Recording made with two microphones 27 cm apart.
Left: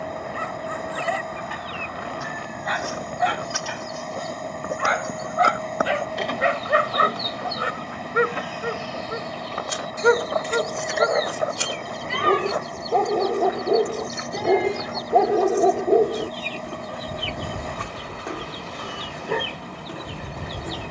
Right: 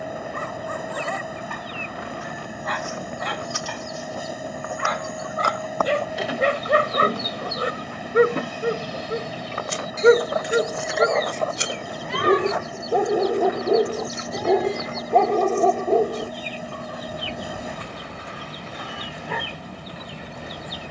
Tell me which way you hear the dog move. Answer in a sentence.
In this clip you hear the dog move from right to left.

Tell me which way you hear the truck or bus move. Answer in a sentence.
You can hear the truck or bus stay in one place.